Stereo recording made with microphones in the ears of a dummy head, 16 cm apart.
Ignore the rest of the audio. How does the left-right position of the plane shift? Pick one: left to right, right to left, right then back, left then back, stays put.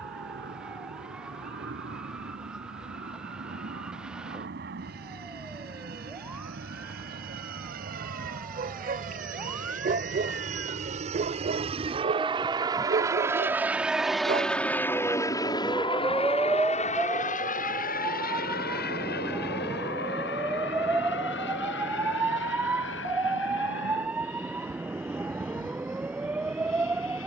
right to left.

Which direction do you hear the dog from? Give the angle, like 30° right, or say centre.
50° right.